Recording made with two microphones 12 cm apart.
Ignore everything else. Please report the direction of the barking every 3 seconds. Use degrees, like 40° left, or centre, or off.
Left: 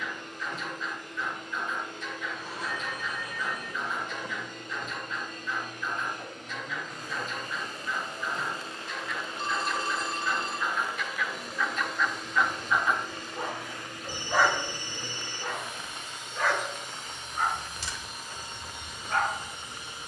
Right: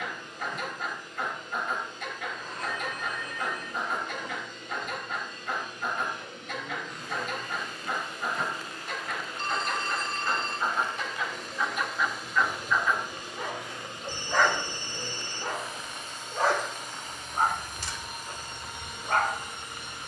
60° right, 60° right, 60° right, 40° right, 10° left, 40° right, 60° right.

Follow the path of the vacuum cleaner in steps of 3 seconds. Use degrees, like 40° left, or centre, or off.
60° left, 60° left, 40° left, 10° left, 20° right, 50° right, 60° right.